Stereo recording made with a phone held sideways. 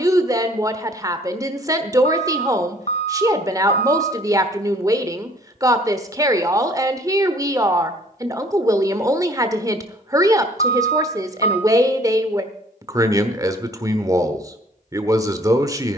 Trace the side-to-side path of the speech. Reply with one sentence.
You can hear the speech stay in one place.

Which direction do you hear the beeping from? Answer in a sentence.
In this clip you hear the beeping on the left.